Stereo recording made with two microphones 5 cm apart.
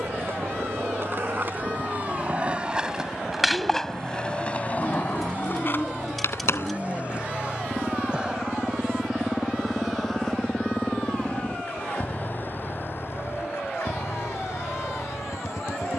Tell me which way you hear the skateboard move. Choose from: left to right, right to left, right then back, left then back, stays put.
right to left.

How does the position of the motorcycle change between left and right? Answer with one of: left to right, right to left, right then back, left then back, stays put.
right to left.